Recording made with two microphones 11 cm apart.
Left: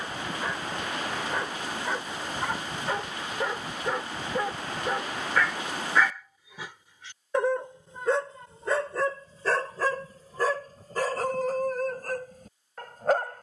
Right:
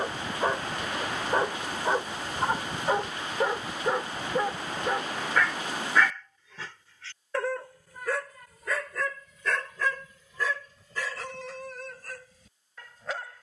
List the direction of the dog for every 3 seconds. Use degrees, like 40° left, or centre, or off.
30° right, 10° right, 20° left, 40° left, 50° left.